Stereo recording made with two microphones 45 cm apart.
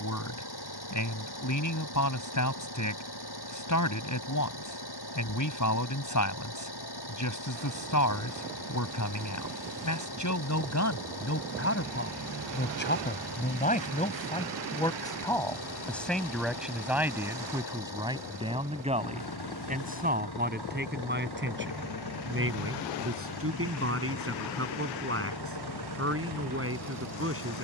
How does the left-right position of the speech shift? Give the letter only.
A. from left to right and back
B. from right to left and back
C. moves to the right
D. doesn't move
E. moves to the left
C.